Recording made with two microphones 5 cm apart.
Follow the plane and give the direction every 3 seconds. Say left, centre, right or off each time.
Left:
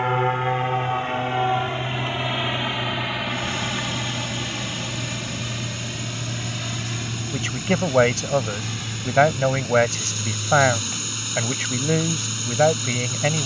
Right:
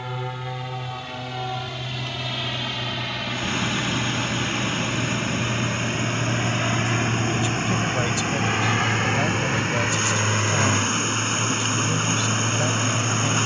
left, centre, right, right, right.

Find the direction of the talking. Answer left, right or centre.
left.